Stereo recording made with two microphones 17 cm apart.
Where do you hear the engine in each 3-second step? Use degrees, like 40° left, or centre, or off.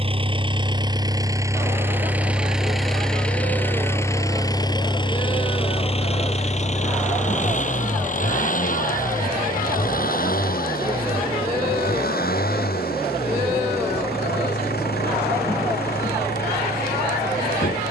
20° right, 20° left, 50° left, 60° left, 70° left, 70° left.